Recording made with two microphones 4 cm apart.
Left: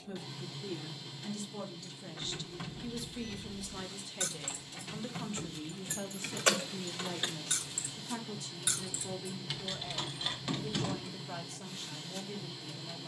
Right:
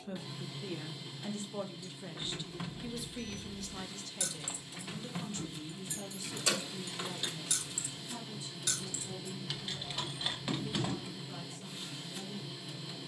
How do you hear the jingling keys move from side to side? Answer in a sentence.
In this clip you hear the jingling keys go left and come back.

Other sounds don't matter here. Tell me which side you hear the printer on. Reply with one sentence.
In this clip you hear the printer in the centre.